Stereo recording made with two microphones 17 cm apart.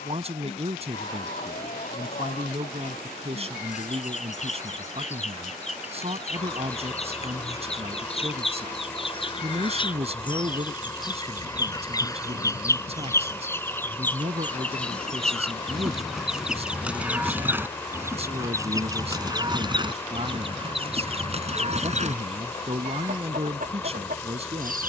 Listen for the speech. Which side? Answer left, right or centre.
right.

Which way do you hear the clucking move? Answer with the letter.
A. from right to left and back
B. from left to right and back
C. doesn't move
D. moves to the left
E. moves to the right
E.